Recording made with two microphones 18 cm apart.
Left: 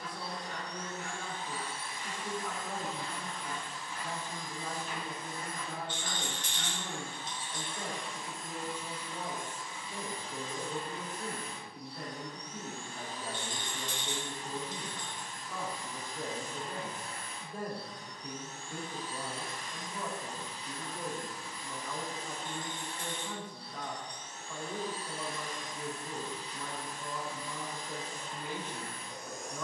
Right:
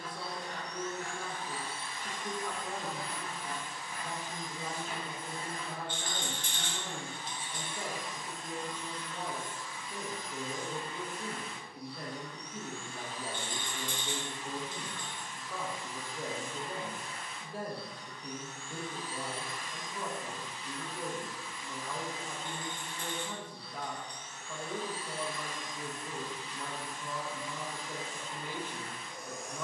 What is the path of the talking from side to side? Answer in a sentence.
You can hear the talking stay put.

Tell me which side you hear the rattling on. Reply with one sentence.
In this clip you hear the rattling on the right.